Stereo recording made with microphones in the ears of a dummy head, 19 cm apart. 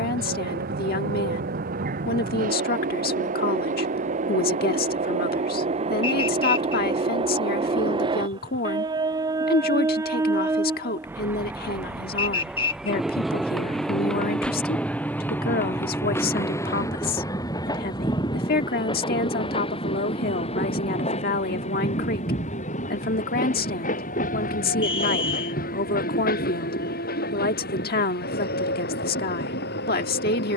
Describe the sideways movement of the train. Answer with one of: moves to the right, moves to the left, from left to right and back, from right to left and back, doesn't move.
moves to the left.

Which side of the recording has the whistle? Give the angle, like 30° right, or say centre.
30° left.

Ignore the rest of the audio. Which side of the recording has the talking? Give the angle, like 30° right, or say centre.
50° left.